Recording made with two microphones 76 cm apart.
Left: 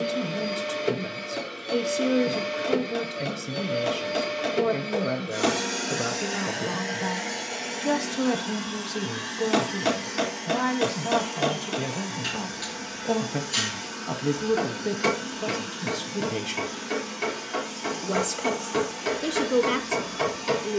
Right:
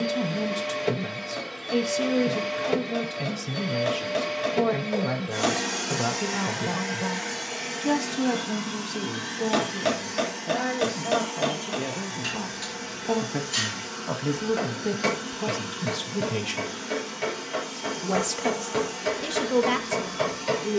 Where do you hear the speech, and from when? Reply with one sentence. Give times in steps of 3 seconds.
You can hear the speech on the right from 0 s, in the centre from 6 s, on the left from 9 s, in the centre from 12 s and on the right from 15 s.